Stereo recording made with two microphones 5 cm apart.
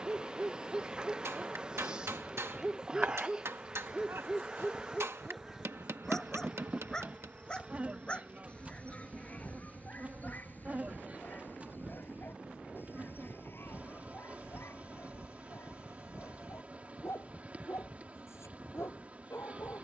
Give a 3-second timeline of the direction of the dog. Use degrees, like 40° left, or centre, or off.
20° right, centre, 20° left, 40° left, 50° left, 60° left, 70° left.